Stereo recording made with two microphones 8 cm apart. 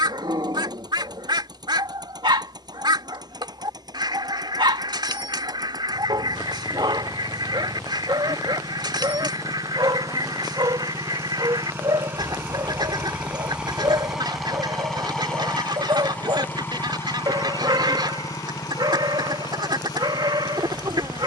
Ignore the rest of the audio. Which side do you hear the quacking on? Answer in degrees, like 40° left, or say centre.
70° right.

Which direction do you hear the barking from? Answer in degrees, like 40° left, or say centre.
70° right.